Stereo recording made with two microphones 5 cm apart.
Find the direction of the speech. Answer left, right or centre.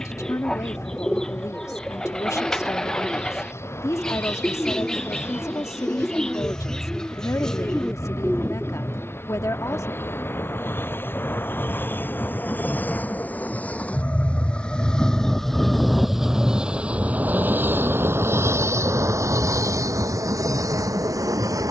left.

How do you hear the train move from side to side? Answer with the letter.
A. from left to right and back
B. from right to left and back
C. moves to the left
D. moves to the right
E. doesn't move
D.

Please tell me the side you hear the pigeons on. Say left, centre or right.
centre.